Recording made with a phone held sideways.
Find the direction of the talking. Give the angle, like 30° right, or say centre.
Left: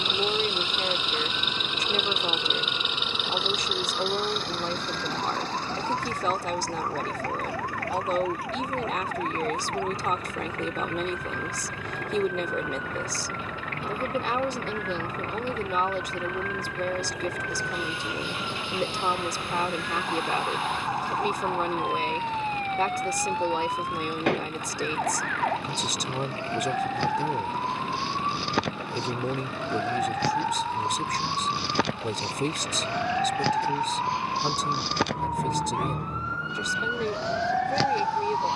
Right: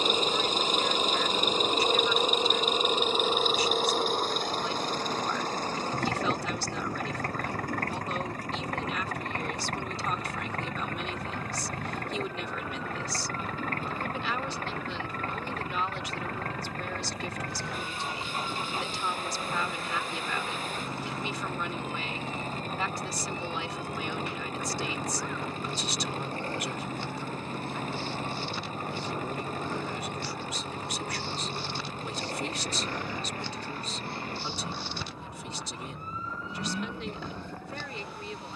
50° left.